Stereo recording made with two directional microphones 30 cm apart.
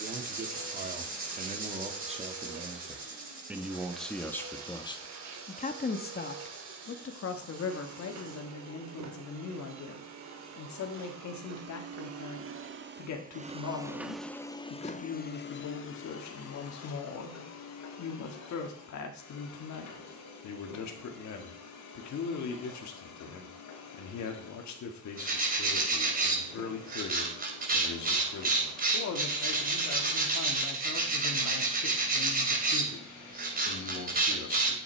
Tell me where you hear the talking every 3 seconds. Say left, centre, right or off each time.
right, centre, left, left, left, left, left, left, left, left, left, left.